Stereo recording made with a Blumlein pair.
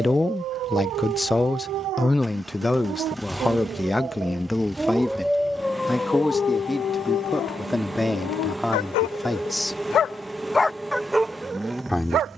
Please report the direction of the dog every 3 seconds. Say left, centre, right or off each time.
right, centre, left, centre.